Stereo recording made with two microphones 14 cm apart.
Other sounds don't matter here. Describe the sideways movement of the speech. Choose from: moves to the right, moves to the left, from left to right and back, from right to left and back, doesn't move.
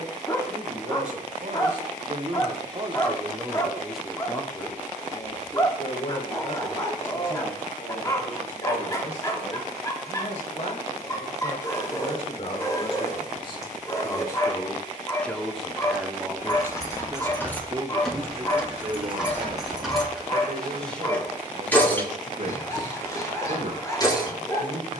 from right to left and back.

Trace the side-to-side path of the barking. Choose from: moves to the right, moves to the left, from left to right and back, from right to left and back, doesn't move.
doesn't move.